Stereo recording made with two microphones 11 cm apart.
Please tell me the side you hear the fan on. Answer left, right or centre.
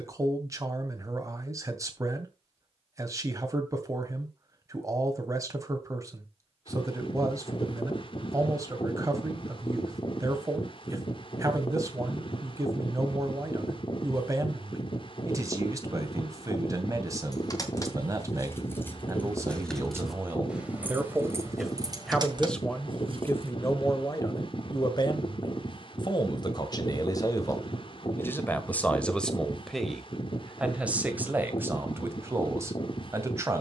left.